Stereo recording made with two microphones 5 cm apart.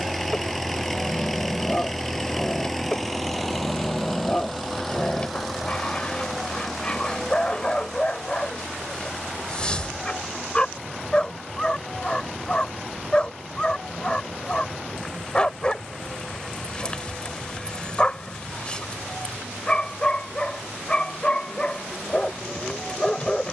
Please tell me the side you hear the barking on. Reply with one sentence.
In this clip you hear the barking on the left.